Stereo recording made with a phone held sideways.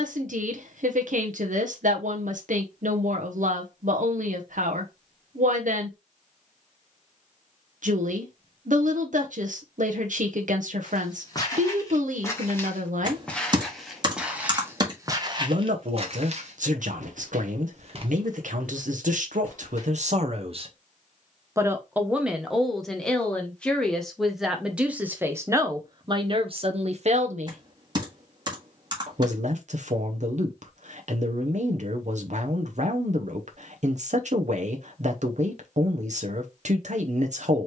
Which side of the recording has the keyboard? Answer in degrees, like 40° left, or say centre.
30° right.